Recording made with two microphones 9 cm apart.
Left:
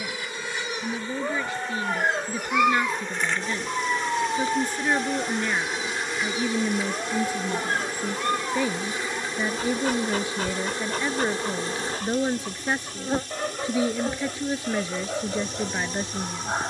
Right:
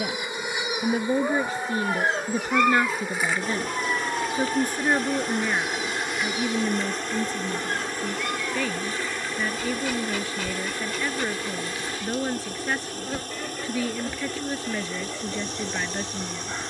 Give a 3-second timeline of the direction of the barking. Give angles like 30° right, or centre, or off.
centre, 20° left, 40° left, 40° left, 50° left, 50° left.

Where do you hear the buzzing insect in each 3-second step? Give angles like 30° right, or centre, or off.
10° right, centre, 10° left, 30° left, 40° left, 50° left.